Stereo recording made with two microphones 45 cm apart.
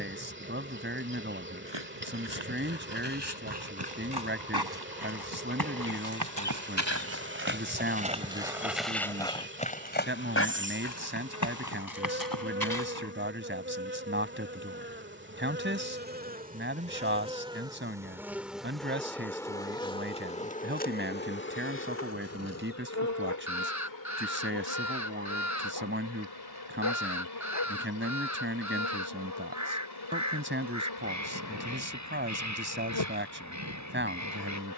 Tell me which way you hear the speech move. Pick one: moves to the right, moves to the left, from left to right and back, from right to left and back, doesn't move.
doesn't move.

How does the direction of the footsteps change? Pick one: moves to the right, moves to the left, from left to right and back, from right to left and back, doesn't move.
moves to the left.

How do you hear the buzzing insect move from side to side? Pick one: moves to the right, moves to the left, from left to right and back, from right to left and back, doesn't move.
moves to the left.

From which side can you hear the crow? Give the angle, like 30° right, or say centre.
40° right.